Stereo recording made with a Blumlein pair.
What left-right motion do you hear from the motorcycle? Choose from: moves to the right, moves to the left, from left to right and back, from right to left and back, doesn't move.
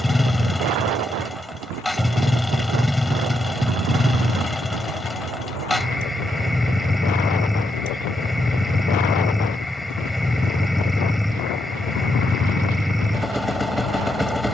doesn't move.